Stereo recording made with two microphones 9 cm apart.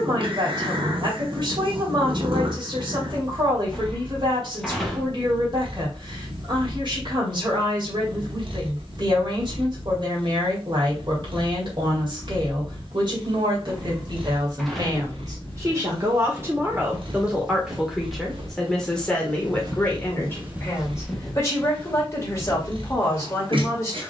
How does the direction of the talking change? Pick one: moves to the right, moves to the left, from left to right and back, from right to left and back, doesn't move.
moves to the left.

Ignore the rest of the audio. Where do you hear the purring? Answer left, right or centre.
right.